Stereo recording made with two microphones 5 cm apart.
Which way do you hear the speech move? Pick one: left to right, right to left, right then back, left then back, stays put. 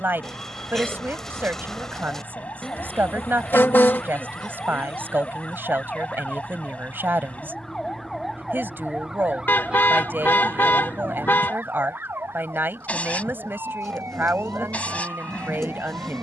stays put.